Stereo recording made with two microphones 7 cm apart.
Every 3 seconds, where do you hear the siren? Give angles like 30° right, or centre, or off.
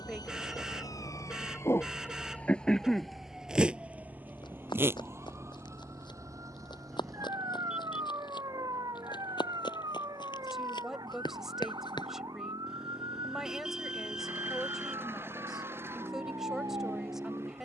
40° left, 20° right, 50° right, 60° right, 60° right, 60° right.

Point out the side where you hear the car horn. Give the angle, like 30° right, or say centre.
10° right.